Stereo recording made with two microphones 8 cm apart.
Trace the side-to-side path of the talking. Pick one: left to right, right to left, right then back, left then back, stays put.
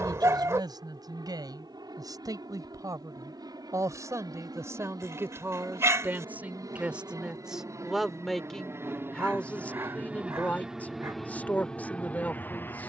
right to left.